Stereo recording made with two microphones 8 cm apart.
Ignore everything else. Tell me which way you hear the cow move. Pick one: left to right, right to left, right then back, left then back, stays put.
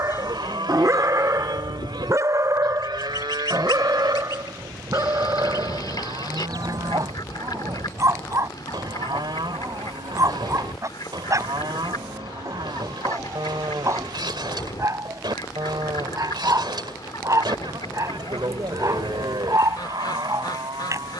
stays put.